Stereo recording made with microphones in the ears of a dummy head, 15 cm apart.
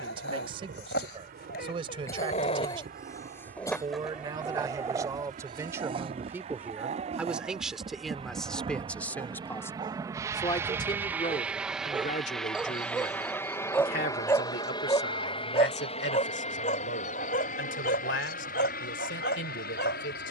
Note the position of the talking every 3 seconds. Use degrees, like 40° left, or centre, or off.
30° right, 20° right, centre, 20° left, 50° left, 70° left, 70° left.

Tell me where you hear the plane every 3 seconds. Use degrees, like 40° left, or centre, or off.
60° right, 50° right, 40° right, 20° right, 10° left, 40° left, 50° left.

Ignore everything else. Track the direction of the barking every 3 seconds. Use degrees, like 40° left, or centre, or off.
50° left, 10° right, 40° right, 20° right, 10° left, 40° left, 60° left.